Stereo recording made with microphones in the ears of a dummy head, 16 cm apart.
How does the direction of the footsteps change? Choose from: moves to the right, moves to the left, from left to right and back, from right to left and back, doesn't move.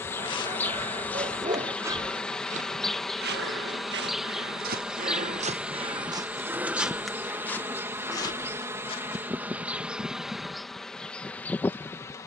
from left to right and back.